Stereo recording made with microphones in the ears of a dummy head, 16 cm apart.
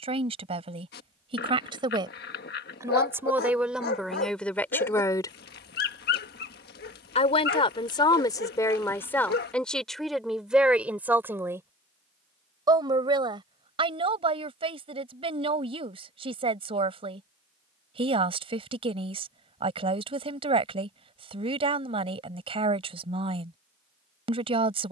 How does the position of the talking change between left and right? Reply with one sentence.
In this clip you hear the talking go left and come back.